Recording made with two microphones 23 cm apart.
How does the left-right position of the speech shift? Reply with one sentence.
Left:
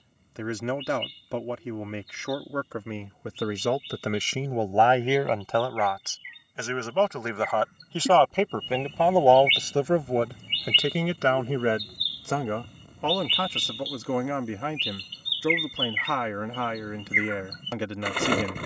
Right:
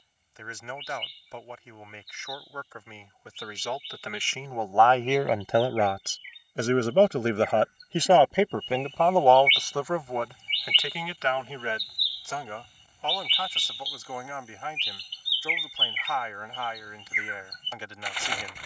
In this clip you hear the speech go right and come back.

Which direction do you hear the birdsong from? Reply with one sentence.
You can hear the birdsong on the left.